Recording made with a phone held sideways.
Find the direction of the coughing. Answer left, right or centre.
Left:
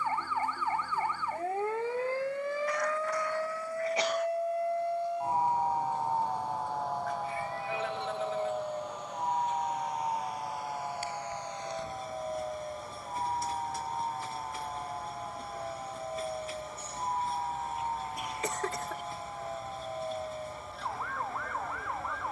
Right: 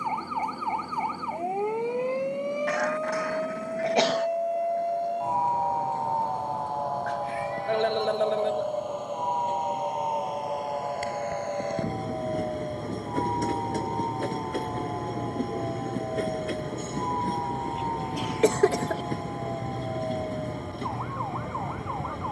right.